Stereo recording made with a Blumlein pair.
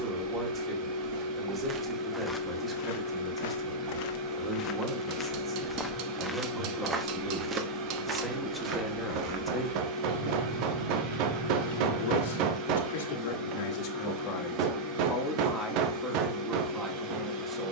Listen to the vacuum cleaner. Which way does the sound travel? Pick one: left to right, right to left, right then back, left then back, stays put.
stays put.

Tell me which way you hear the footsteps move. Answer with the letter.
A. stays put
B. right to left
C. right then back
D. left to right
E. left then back
E.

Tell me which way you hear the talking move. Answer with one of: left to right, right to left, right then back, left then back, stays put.
left then back.